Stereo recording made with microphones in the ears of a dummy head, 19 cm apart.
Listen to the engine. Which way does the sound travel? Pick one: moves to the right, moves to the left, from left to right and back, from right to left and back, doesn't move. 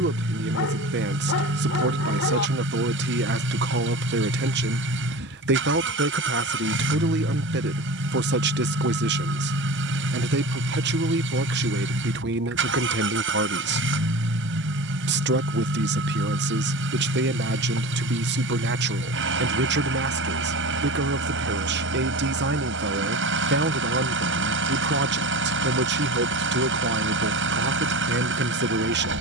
doesn't move.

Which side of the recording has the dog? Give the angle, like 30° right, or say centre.
70° left.